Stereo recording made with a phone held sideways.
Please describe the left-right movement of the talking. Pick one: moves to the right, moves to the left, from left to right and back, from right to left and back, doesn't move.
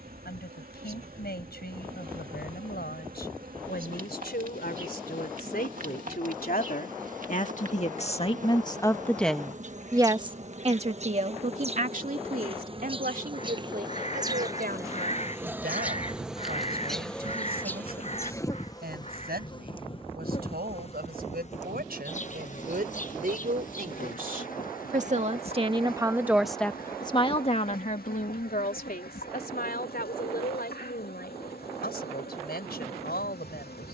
from left to right and back.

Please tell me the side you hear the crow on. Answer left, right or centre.
left.